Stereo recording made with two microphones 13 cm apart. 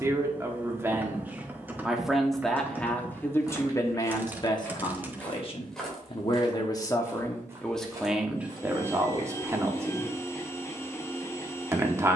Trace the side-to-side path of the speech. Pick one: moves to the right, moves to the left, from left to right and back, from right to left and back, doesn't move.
from right to left and back.